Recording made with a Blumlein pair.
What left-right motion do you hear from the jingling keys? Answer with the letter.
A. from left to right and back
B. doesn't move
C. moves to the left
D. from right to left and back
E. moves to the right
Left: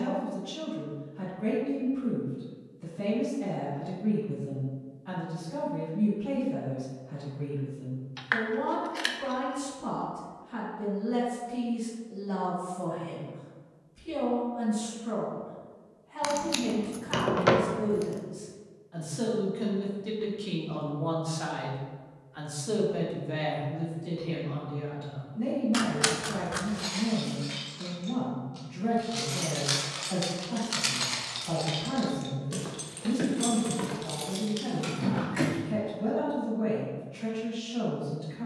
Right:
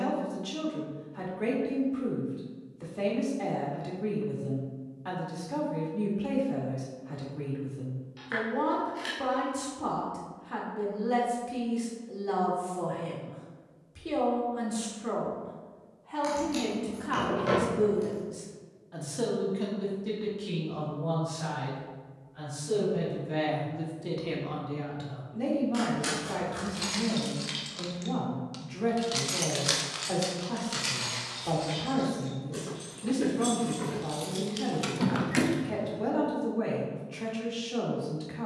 D.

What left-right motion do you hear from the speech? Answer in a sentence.
You can hear the speech move from right to left and back again.